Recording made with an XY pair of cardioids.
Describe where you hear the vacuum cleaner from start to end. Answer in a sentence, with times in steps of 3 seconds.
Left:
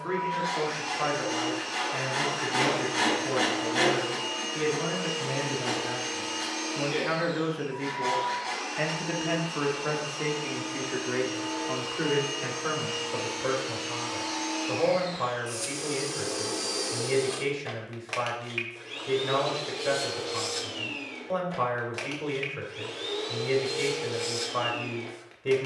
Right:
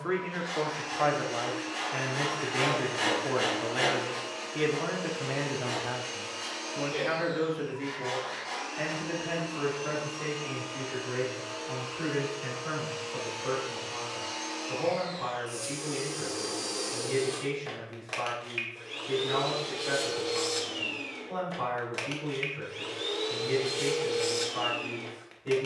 You can hear the vacuum cleaner on the left from 0 s and in the centre from 18 s.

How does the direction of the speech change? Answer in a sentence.
In this clip you hear the speech move to the left.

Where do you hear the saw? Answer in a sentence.
In this clip you hear the saw on the left.